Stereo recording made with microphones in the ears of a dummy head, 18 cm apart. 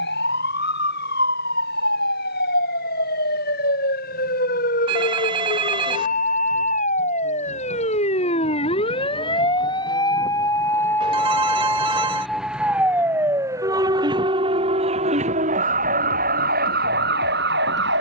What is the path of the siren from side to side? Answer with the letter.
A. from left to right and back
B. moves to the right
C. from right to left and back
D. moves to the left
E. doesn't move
B.